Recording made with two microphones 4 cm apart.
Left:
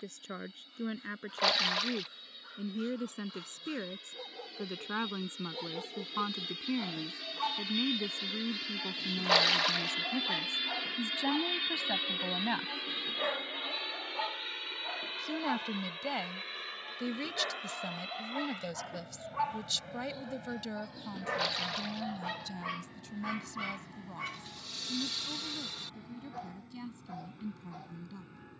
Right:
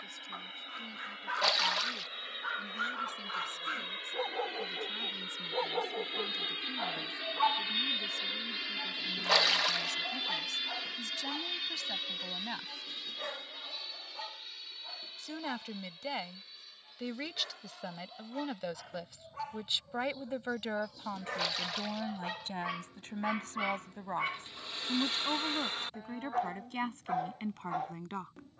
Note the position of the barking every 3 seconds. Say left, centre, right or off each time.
right, right, right, centre, left, left, left, centre, right, right.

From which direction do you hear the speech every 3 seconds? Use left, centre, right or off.
left, left, left, left, left, centre, right, right, right, right.